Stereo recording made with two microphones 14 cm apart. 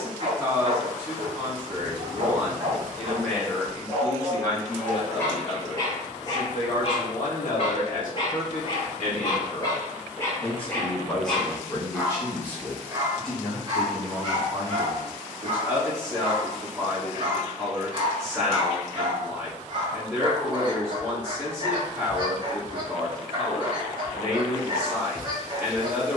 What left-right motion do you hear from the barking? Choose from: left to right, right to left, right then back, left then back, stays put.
left then back.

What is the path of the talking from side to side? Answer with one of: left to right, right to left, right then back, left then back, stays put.
left then back.